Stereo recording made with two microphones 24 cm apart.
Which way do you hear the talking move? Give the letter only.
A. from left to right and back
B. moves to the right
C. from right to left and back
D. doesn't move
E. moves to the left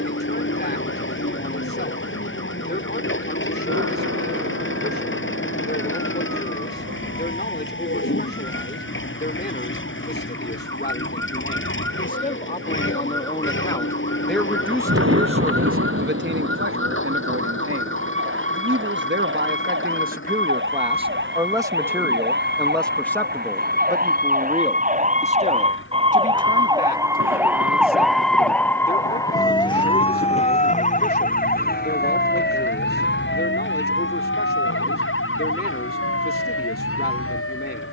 A.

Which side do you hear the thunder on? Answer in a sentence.
You can hear the thunder on the right.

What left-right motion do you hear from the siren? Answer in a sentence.
In this clip you hear the siren go from the right side to the left.